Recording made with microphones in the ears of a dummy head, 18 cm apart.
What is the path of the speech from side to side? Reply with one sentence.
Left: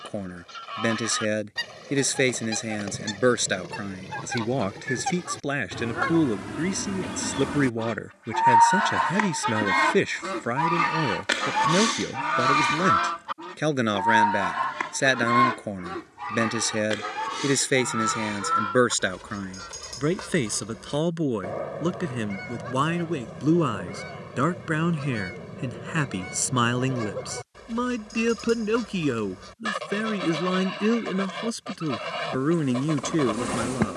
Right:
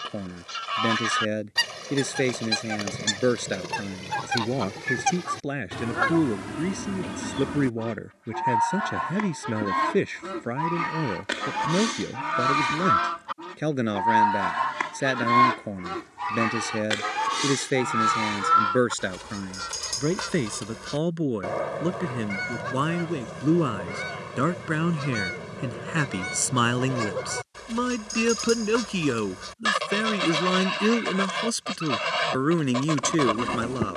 In this clip you hear the speech travel towards the right.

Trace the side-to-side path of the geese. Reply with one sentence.
You can hear the geese go left and come back.